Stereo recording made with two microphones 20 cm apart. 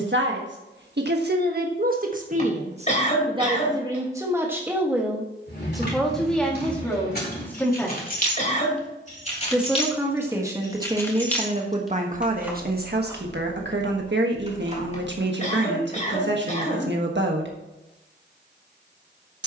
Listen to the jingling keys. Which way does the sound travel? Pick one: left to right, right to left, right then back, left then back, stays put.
left to right.